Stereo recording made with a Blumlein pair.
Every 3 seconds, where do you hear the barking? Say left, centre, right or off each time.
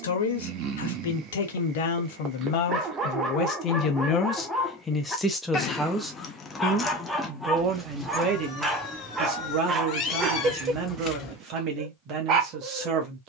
right, centre, centre, right, right.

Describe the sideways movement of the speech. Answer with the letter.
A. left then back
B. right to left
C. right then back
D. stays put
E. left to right
E.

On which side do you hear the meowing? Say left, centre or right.
left.